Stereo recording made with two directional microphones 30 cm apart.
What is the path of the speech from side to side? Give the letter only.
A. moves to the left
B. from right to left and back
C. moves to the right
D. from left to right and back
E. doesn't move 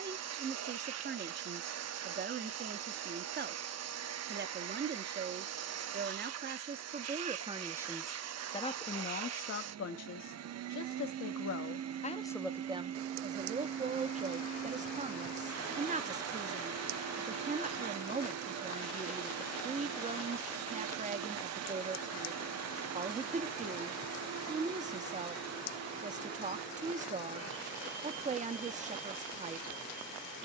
B.